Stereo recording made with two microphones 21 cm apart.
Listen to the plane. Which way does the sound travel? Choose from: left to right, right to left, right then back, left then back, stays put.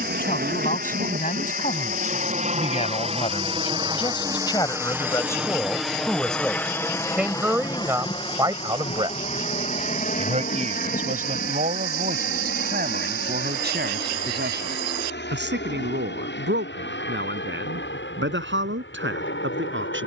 right to left.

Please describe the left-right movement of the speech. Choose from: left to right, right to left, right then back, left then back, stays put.
left to right.